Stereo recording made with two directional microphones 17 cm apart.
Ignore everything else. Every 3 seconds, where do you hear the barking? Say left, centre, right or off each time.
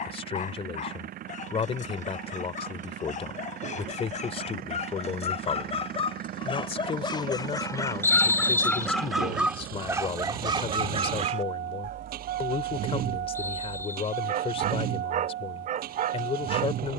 left, left, left, right, right, right.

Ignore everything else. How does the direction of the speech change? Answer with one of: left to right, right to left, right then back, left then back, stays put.
stays put.